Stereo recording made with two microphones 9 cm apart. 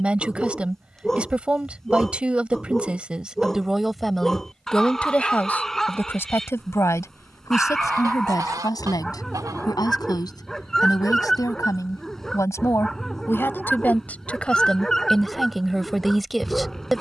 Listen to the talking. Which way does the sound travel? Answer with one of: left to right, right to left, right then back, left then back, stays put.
left then back.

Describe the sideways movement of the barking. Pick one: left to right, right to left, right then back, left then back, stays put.
stays put.